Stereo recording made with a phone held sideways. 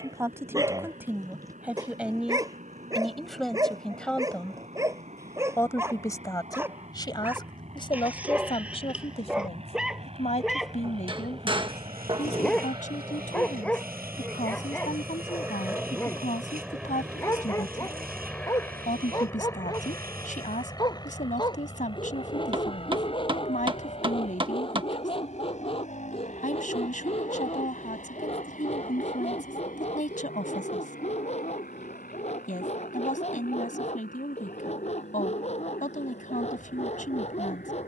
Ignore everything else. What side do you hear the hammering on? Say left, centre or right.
right.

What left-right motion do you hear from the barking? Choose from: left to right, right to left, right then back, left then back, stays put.
right to left.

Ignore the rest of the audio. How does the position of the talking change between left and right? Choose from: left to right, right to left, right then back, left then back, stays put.
right to left.